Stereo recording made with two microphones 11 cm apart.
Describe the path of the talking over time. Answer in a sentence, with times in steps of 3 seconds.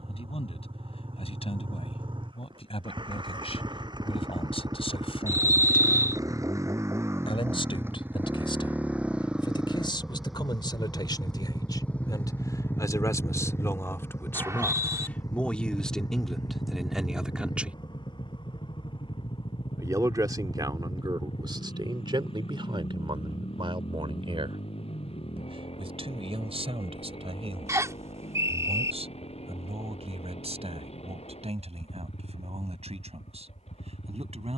You can hear the talking on the left from 0 s, in the centre from 15 s and on the right from 18 s.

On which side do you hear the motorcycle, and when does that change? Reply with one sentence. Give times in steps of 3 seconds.
In this clip you hear the motorcycle on the right from 0 s, in the centre from 9 s and on the left from 12 s.